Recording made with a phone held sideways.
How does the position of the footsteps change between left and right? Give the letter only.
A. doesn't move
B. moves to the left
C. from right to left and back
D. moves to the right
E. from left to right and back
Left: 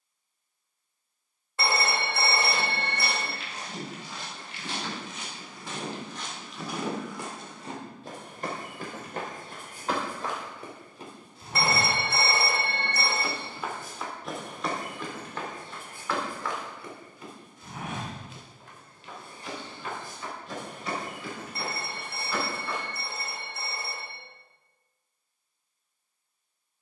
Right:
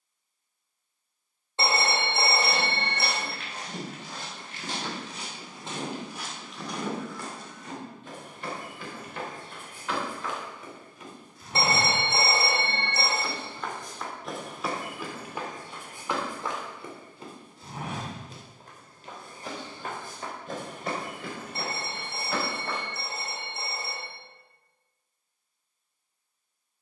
C.